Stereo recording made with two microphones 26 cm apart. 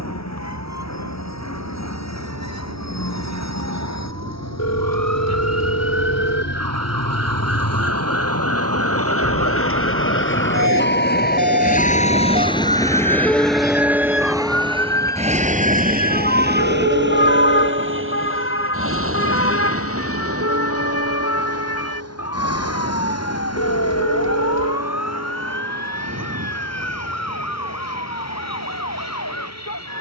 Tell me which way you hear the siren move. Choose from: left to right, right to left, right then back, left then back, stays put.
right to left.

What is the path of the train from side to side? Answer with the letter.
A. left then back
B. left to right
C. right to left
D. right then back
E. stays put
B.